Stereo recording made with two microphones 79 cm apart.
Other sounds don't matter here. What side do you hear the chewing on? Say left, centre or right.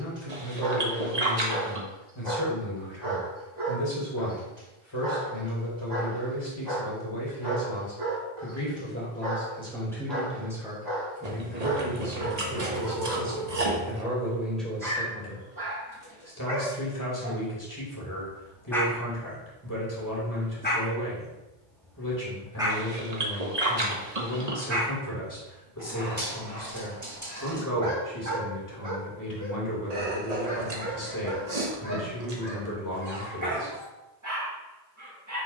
right.